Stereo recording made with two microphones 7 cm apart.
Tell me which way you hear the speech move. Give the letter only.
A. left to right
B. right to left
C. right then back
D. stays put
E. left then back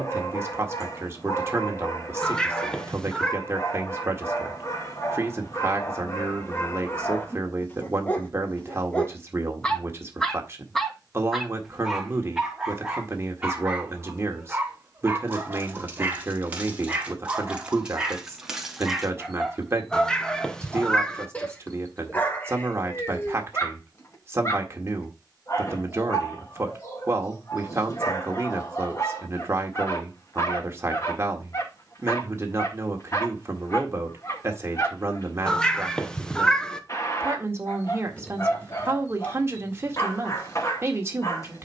D.